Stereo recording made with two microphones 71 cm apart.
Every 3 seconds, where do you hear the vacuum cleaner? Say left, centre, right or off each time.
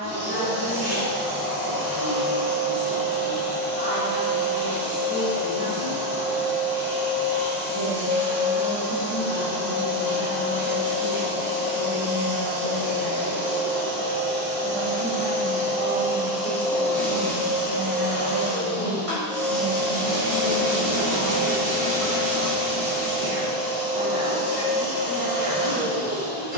right, right, right, right, right, centre, centre, right, right.